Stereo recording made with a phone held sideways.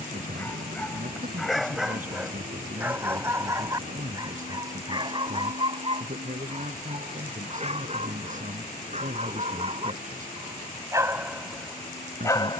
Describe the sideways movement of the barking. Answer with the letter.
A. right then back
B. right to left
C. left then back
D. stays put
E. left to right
A.